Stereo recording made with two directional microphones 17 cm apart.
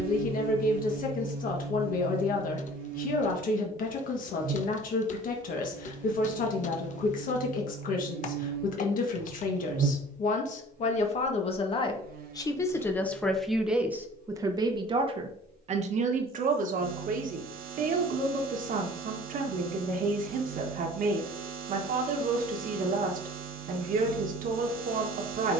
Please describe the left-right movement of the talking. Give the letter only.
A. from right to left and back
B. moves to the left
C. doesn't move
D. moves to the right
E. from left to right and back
D.